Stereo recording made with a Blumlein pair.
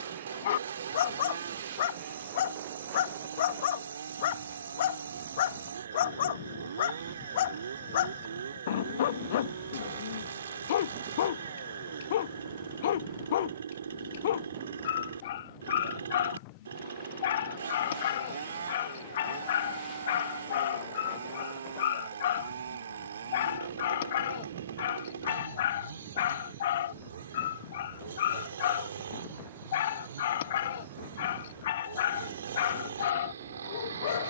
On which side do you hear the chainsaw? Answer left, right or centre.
right.